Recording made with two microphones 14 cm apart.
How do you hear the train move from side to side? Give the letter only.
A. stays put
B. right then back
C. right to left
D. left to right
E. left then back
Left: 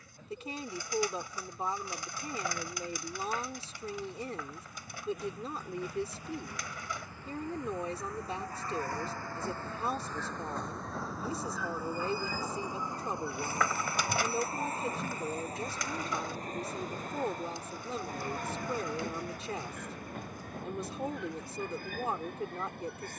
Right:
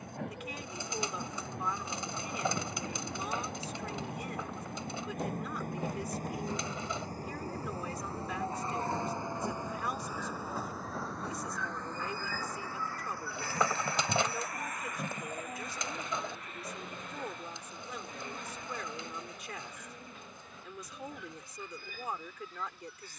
C.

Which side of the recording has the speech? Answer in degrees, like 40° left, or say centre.
30° left.